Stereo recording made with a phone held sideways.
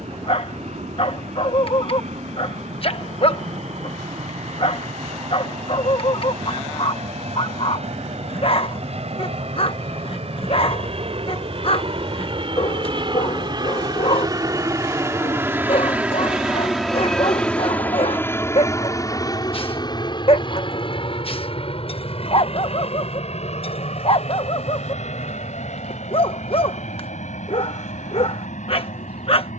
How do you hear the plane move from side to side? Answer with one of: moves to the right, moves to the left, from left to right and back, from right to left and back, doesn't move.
moves to the left.